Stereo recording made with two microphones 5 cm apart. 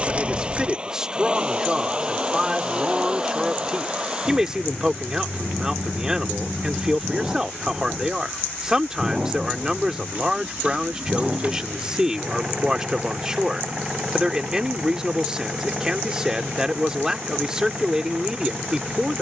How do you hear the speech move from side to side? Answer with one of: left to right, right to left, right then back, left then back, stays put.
stays put.